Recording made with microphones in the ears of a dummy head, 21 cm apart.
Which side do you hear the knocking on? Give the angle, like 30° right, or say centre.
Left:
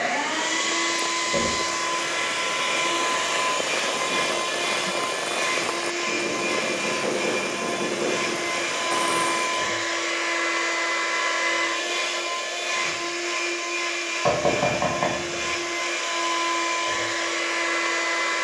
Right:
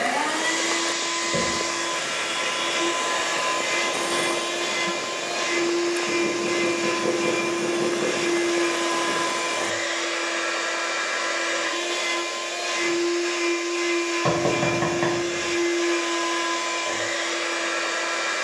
20° right.